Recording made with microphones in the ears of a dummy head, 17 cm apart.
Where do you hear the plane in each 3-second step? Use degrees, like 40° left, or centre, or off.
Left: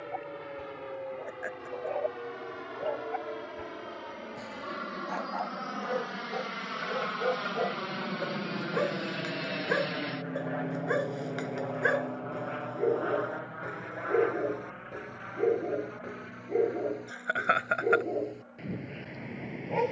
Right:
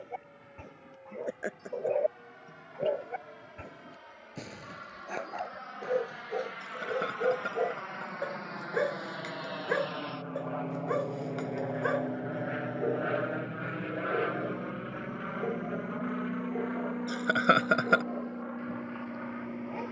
70° left, 60° left, 50° left, 10° left, 30° right, 50° right, 60° right.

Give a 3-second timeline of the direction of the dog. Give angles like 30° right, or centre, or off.
40° right, 30° right, 20° right, 10° left, 30° left, 40° left, 50° left.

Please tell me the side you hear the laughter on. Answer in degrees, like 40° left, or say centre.
50° right.